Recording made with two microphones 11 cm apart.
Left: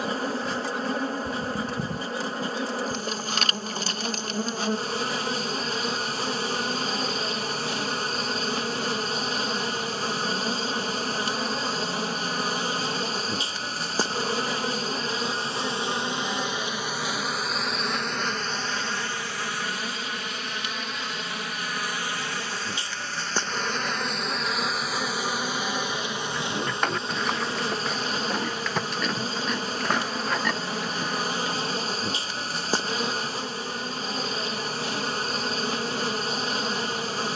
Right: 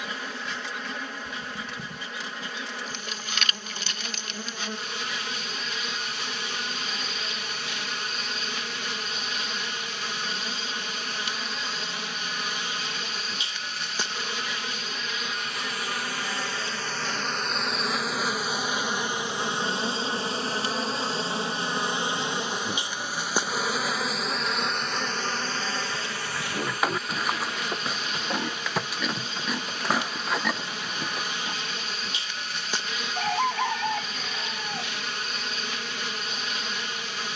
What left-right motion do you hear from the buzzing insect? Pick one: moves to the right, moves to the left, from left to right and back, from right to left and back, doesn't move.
from left to right and back.